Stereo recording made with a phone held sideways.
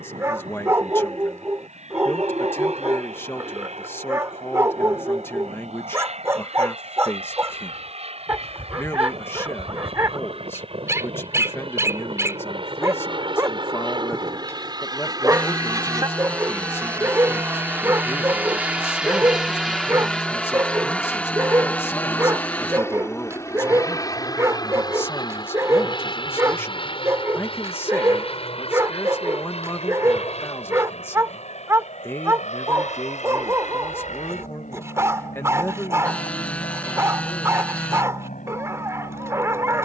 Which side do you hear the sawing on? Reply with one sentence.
You can hear the sawing in the centre.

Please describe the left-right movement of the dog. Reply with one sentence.
You can hear the dog stay in one place.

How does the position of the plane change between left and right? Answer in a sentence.
In this clip you hear the plane go from the right side to the left.